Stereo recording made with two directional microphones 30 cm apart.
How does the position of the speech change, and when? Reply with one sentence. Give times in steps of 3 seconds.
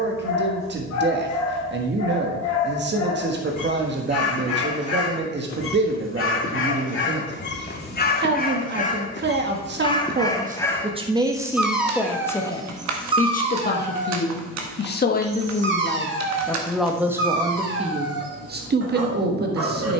In this clip you hear the speech on the right from 0 s, on the left from 12 s, in the centre from 15 s and on the right from 18 s.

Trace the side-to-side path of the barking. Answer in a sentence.
In this clip you hear the barking move from left to right.